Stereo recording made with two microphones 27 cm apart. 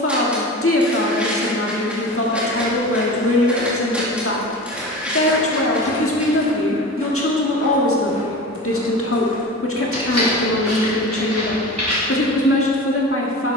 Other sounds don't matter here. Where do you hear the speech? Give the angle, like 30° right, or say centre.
50° left.